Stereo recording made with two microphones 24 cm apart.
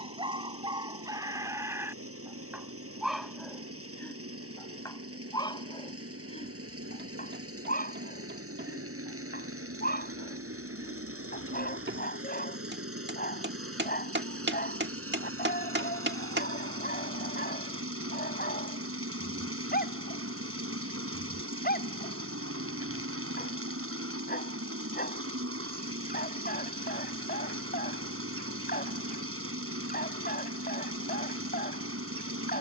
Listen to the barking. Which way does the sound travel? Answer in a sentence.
You can hear the barking go from the right side to the left.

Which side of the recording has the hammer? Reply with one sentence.
You can hear the hammer on the right.